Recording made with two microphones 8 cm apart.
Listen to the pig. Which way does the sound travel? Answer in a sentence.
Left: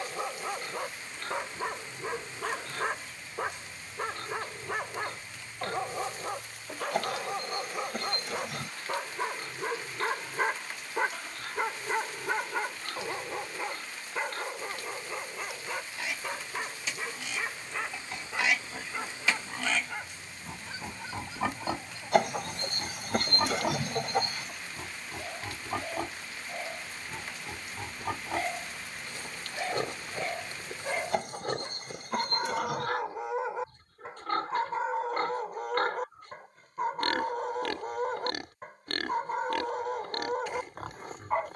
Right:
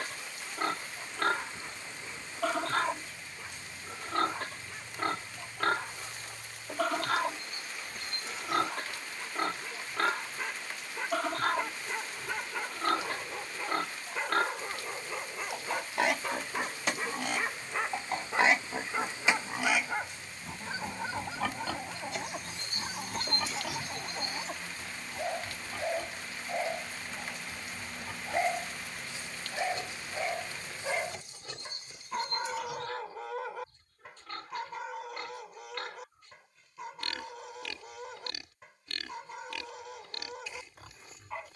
In this clip you hear the pig travel towards the left.